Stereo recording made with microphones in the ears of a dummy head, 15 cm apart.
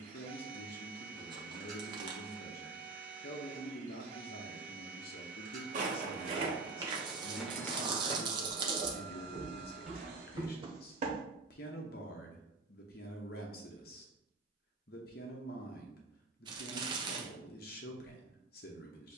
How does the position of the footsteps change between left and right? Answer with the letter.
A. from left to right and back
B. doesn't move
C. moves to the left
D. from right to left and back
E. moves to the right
D.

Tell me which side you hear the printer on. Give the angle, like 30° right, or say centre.
50° right.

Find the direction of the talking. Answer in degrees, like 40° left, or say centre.
60° left.